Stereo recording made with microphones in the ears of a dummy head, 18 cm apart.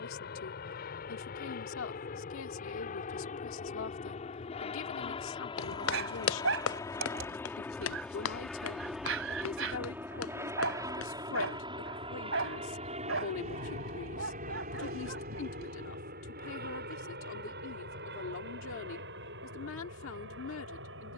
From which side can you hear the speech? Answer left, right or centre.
left.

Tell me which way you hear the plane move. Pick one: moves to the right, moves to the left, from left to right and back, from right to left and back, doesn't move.
moves to the right.